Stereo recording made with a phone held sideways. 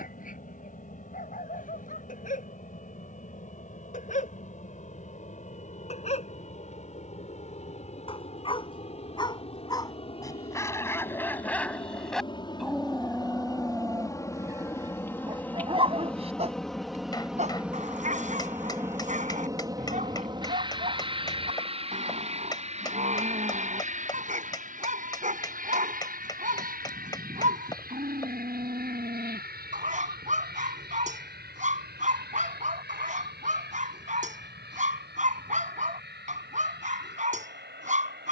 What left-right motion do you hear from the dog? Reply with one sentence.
You can hear the dog go from the left side to the right.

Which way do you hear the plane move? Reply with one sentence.
You can hear the plane go from the left side to the right.